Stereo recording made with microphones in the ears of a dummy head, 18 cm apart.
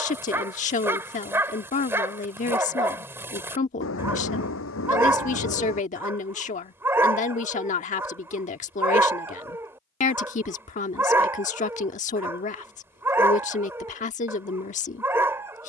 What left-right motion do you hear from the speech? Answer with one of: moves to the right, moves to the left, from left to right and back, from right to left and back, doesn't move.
doesn't move.